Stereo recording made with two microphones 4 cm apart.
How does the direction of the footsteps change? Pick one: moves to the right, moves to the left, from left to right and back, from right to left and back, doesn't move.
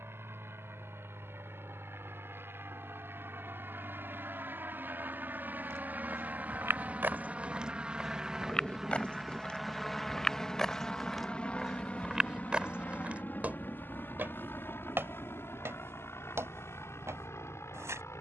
from right to left and back.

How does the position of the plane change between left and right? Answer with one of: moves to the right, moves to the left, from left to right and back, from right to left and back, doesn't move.
moves to the left.